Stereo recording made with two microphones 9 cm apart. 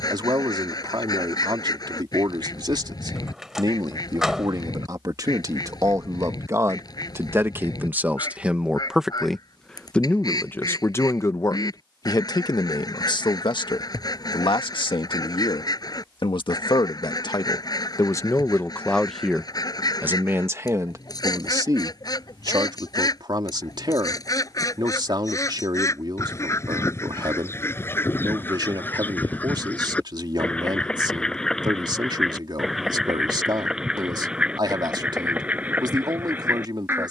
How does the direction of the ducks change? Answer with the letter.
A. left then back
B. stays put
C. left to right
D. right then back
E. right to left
C.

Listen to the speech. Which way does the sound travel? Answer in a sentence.
You can hear the speech move from right to left and back again.